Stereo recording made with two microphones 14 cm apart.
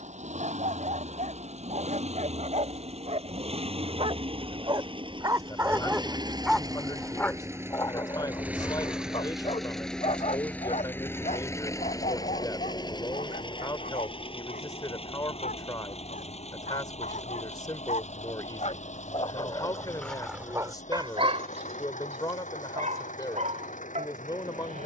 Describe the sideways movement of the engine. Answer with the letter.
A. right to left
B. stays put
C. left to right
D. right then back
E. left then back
A.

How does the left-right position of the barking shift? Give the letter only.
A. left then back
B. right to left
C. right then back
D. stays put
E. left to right
A.